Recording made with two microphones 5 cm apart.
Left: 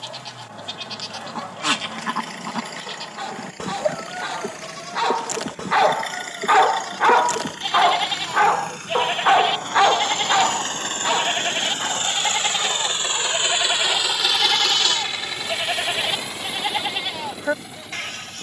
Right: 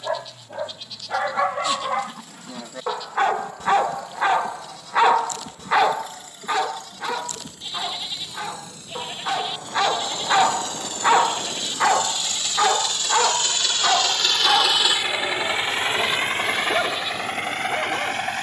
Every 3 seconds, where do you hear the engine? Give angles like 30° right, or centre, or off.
70° left, 70° left, 60° left, 50° left, 20° left, 50° right.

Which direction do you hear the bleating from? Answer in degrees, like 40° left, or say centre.
80° left.